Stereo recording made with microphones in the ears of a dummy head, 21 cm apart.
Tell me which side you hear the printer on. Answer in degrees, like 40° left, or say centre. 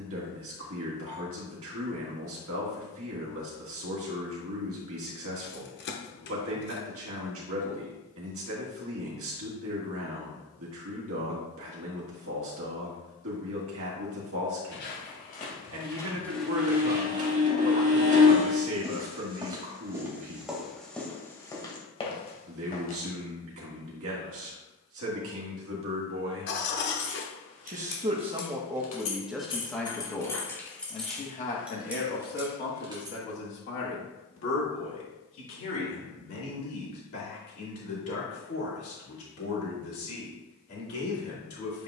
30° right.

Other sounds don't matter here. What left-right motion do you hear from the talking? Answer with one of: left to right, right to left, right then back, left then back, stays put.
right to left.